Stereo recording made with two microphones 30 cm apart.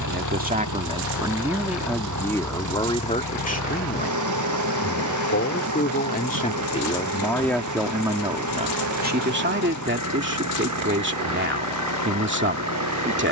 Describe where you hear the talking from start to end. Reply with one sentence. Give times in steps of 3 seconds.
You can hear the talking in the centre from 0 s, on the left from 3 s, in the centre from 6 s and on the right from 9 s.